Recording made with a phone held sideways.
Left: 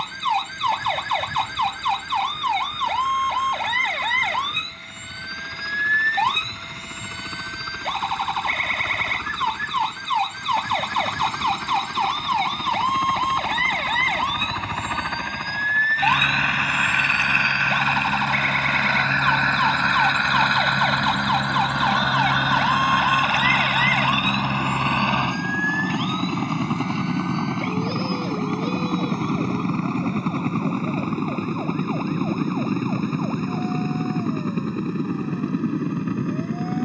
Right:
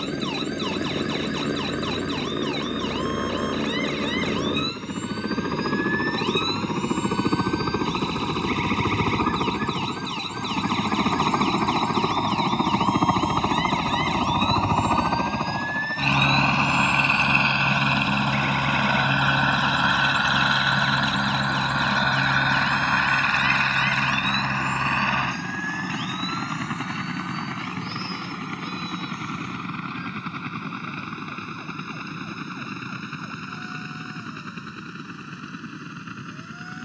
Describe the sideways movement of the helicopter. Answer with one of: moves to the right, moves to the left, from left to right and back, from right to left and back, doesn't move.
moves to the left.